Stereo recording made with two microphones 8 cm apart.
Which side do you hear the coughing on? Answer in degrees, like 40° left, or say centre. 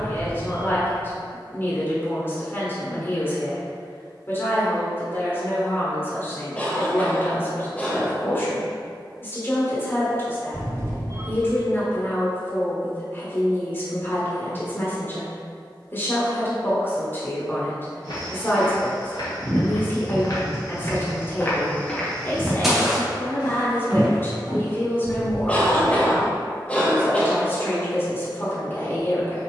20° left.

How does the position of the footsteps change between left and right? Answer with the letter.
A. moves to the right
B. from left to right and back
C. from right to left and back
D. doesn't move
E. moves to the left
A.